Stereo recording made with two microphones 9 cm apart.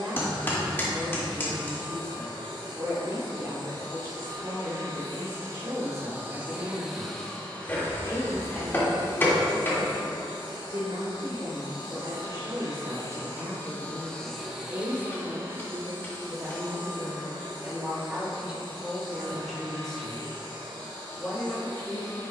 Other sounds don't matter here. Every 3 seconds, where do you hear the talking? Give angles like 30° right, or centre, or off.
40° right, 40° right, 40° right, 40° right, 40° right, 30° right, centre, 30° left.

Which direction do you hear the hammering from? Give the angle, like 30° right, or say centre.
30° left.